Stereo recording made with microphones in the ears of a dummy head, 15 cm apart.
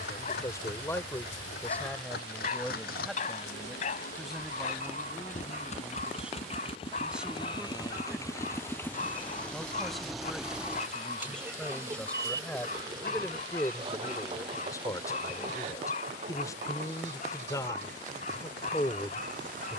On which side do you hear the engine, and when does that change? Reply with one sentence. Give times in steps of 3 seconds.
You can hear the engine on the left from 0 s, in the centre from 9 s and on the right from 12 s.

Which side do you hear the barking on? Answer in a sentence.
In this clip you hear the barking on the left.